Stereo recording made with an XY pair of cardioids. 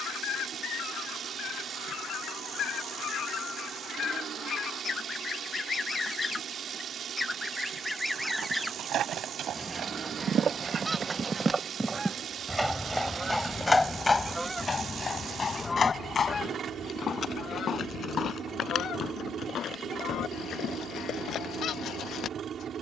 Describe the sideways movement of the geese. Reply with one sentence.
In this clip you hear the geese go right and come back.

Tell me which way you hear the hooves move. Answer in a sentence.
In this clip you hear the hooves move from right to left.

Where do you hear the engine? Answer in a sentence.
You can hear the engine on the right.